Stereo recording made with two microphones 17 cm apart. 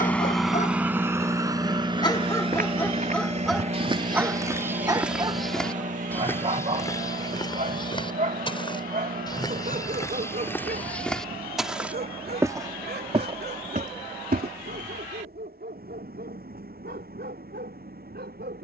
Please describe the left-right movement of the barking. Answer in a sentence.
You can hear the barking move to the right.